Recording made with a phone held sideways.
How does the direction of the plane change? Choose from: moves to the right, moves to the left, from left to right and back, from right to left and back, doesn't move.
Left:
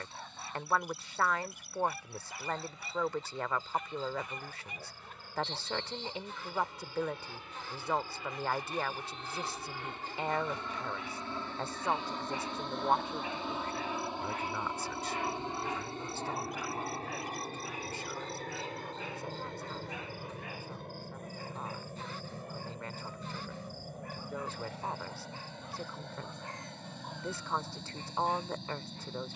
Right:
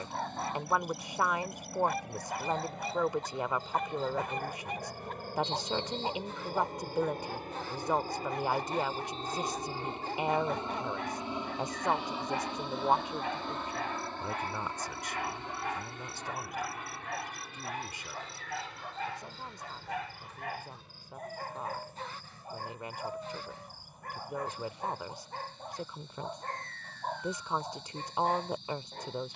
moves to the left.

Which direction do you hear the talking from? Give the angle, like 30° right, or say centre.
20° right.